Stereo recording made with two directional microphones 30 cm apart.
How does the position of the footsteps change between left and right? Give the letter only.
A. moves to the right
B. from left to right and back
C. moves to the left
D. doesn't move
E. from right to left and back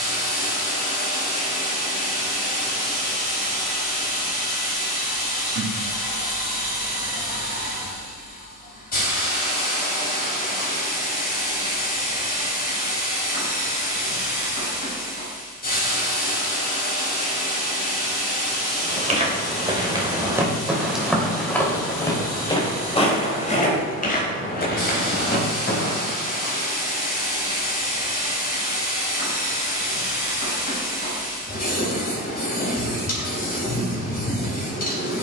C.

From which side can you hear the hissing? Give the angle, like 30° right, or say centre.
30° left.